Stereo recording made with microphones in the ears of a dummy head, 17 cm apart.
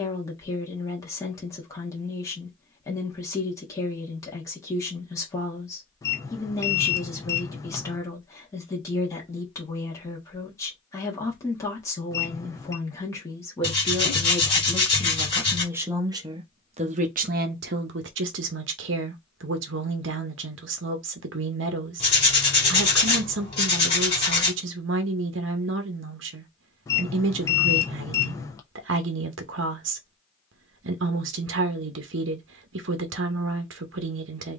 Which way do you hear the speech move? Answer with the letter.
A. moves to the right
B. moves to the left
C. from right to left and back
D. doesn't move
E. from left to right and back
A.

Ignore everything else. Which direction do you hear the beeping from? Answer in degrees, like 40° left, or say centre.
20° left.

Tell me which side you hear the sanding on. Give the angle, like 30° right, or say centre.
30° left.